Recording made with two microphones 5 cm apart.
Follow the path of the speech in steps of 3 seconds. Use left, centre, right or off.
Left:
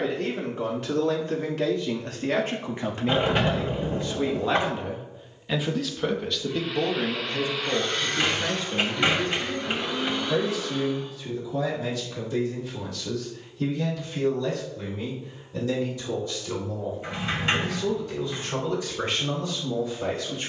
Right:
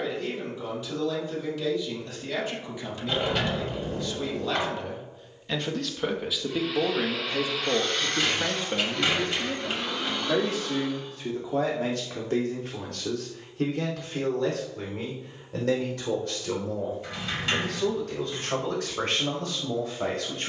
left, left, right, right, right, right, right.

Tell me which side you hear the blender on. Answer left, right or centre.
centre.